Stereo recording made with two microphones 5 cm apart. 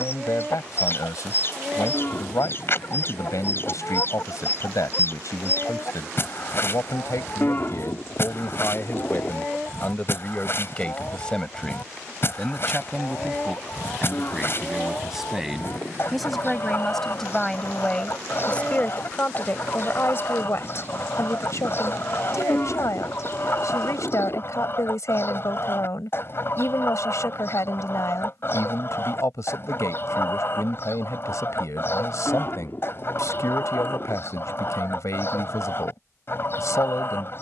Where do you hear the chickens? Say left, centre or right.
left.